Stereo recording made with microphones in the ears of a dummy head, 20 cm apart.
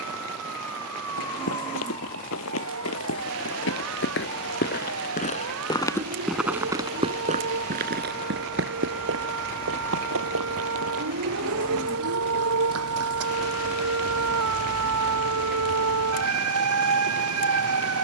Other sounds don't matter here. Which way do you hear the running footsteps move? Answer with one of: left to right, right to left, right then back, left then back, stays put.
left to right.